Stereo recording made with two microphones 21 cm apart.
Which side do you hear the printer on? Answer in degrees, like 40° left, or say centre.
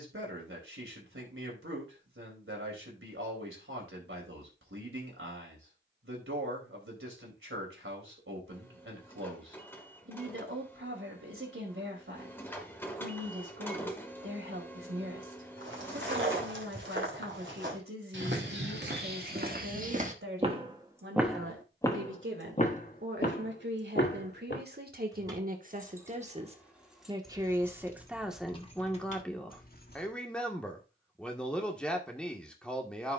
10° left.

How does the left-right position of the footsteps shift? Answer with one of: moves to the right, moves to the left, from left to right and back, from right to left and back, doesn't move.
moves to the left.